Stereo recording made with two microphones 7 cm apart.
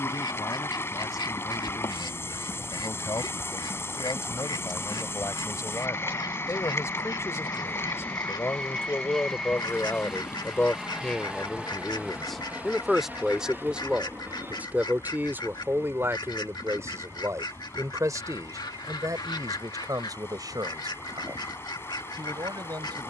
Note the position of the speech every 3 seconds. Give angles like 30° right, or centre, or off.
60° left, 50° left, 40° left, 20° left, 10° right, 40° right, 60° right, 70° right.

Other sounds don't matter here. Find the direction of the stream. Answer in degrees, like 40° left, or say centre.
40° left.